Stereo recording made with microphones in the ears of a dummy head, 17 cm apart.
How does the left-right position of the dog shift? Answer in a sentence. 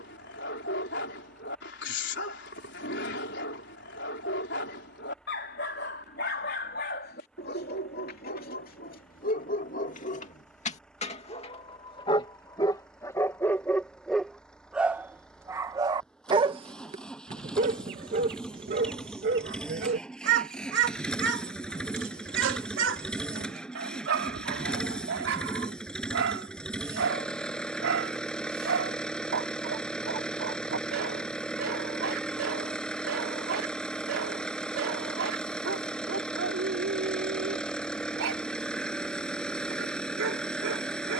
In this clip you hear the dog go from the left side to the right.